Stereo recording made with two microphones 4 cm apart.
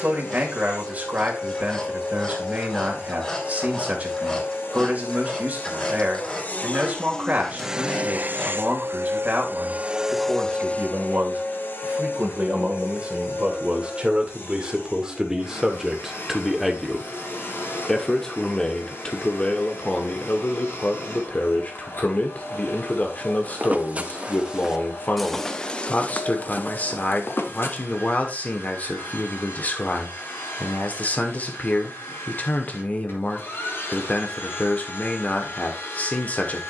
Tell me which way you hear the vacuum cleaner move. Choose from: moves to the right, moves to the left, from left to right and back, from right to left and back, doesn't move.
from left to right and back.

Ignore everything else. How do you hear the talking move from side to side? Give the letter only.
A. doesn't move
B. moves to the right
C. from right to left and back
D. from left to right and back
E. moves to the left
E.